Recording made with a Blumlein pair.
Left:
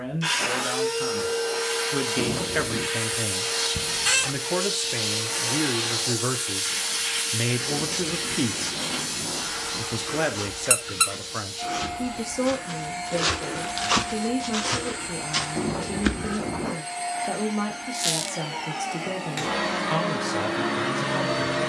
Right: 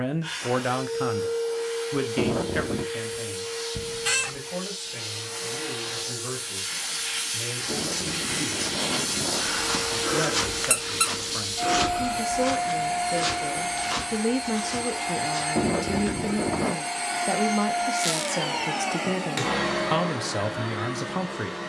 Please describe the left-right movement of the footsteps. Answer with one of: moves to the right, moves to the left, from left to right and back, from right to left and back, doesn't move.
moves to the left.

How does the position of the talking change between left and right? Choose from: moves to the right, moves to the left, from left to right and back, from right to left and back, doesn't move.
from right to left and back.